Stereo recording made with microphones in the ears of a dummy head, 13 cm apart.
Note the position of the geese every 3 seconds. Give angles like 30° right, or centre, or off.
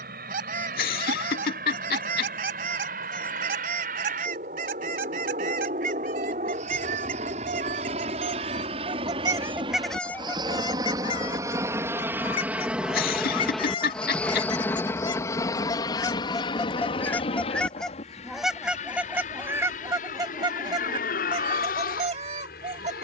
60° right, 60° right, 50° right, 10° left, 30° left, 20° left, 20° right, 40° right.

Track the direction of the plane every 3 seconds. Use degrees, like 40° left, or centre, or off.
60° right, 60° right, 50° right, 30° right, centre, 30° left, 50° left, 60° left.